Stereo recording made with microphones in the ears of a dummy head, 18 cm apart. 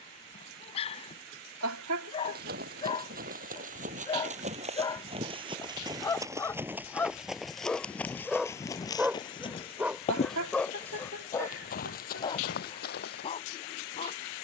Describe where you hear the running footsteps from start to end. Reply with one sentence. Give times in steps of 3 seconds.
You can hear the running footsteps on the right from 0 s, in the centre from 6 s and on the left from 9 s.